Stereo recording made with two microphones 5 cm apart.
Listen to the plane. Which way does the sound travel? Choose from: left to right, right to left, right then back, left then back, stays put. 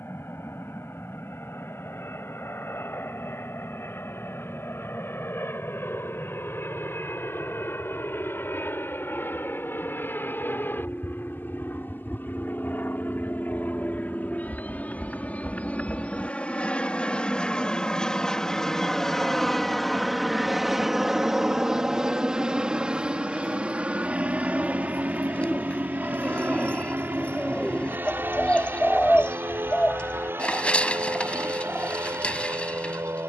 left to right.